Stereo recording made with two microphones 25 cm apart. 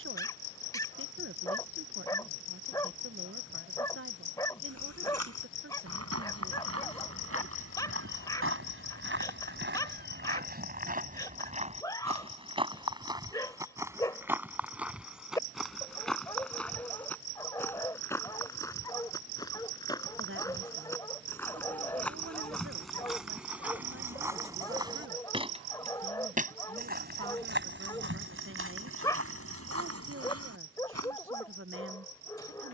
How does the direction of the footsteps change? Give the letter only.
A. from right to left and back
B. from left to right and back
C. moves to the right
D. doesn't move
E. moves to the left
A.